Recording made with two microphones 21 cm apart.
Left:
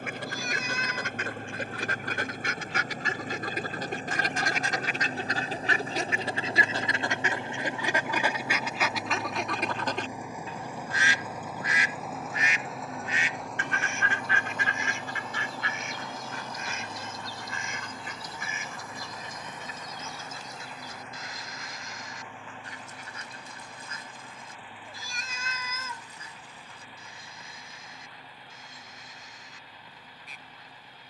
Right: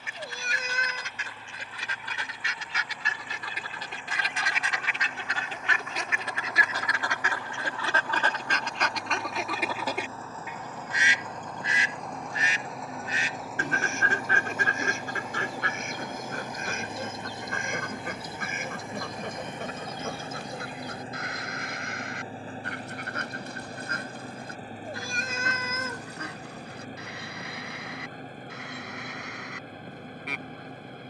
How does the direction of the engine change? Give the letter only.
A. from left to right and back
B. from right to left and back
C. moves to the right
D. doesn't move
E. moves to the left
C.